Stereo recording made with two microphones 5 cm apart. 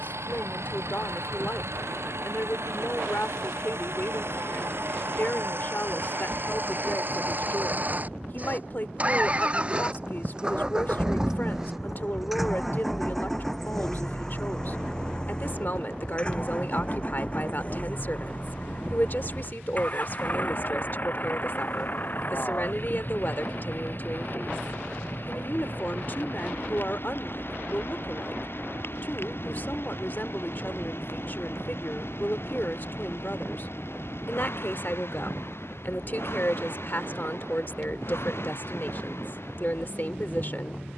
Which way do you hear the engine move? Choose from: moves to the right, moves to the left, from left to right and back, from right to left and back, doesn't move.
moves to the left.